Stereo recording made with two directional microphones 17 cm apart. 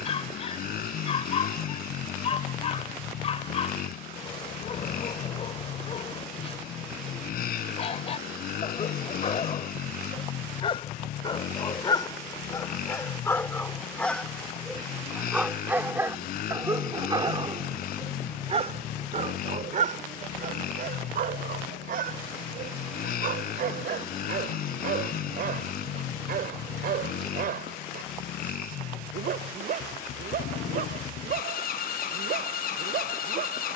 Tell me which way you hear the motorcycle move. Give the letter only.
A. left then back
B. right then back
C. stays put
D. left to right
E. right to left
C.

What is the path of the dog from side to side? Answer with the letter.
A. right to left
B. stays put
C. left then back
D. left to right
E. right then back
D.